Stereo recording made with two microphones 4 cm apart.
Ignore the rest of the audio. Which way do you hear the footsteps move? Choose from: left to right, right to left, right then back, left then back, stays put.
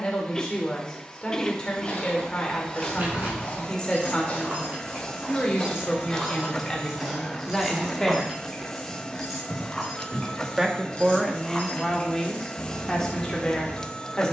left to right.